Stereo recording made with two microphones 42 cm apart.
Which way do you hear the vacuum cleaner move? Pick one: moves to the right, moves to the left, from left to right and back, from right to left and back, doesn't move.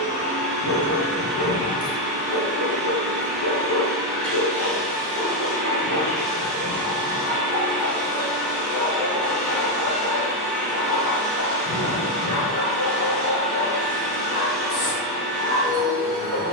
doesn't move.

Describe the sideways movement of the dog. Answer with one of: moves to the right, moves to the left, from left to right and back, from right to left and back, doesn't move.
moves to the left.